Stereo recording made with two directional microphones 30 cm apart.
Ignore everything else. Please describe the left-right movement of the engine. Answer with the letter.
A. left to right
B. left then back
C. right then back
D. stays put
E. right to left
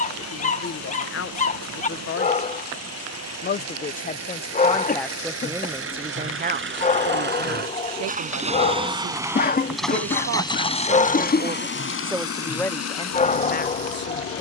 E.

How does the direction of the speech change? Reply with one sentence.
In this clip you hear the speech go right and come back.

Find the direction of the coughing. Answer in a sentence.
In this clip you hear the coughing on the left.